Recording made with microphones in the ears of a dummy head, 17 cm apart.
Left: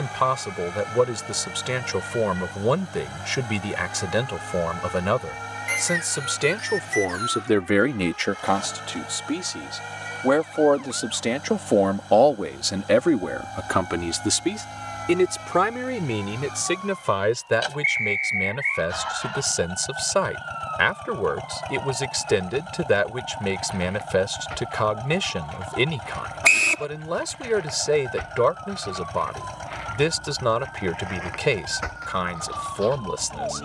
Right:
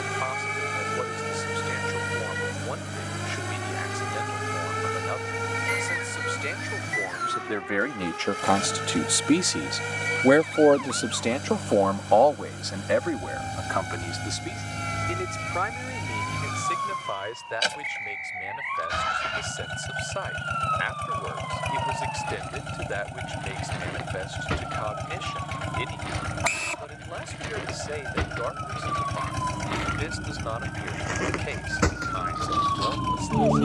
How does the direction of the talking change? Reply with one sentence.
In this clip you hear the talking move from left to right and back again.